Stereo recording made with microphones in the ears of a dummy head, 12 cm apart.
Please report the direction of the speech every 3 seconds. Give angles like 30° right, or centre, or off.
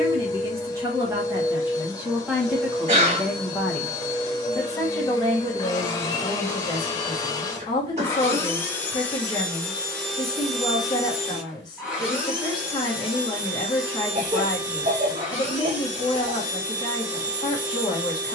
10° right, 20° left, 30° left, 30° left, 30° left, 30° left.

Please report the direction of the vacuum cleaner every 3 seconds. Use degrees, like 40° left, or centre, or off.
20° left, 20° left, 20° left, centre, 10° right, 10° right.